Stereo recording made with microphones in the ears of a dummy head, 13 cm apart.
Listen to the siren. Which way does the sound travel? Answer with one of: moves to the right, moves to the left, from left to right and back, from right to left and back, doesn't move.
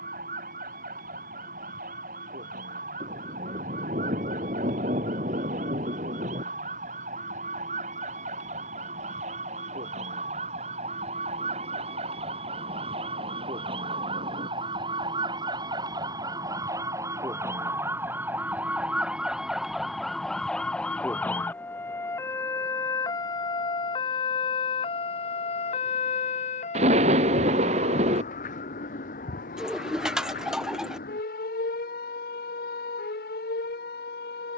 moves to the left.